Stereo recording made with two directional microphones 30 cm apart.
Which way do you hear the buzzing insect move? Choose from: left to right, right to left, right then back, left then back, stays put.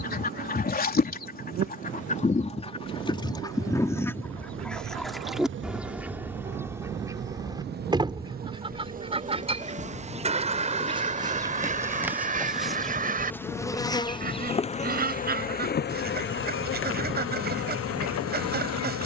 right to left.